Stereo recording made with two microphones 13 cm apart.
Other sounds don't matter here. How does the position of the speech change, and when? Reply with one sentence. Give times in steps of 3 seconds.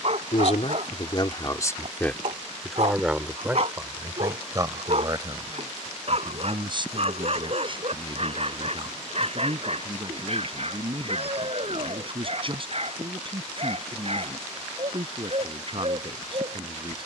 You can hear the speech on the left from 0 s and on the right from 3 s.